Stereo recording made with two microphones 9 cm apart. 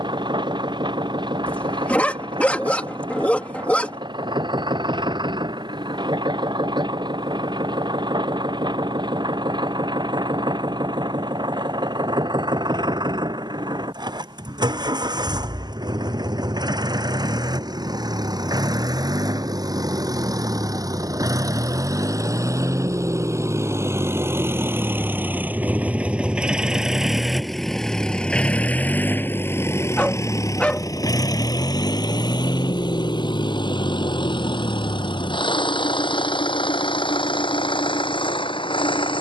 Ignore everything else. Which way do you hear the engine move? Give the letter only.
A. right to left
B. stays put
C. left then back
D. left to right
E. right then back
A.